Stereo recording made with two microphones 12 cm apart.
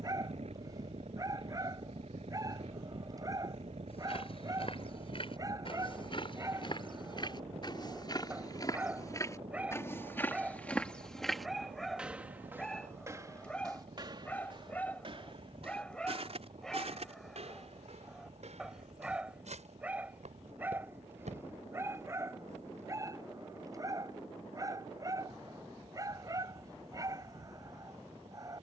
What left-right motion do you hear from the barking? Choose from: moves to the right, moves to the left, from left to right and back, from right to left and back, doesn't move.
from right to left and back.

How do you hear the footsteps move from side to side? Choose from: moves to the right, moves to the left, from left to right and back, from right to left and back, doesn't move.
moves to the right.